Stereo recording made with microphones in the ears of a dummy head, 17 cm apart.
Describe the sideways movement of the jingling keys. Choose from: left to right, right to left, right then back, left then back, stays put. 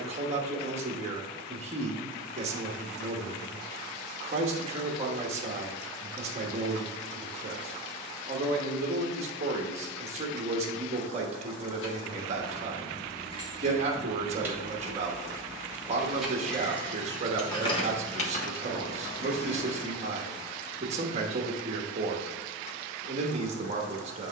right then back.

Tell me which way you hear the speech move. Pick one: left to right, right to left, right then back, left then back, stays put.
stays put.